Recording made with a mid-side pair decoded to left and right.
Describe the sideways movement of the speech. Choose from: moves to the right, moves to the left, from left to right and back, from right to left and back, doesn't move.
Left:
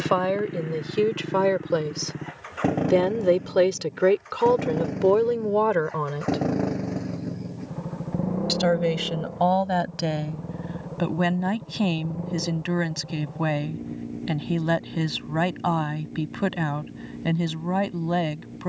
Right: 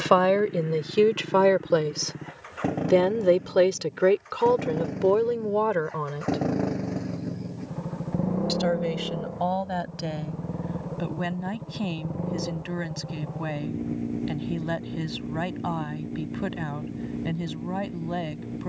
moves to the left.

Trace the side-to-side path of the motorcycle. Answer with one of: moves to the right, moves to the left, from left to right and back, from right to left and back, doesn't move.
moves to the right.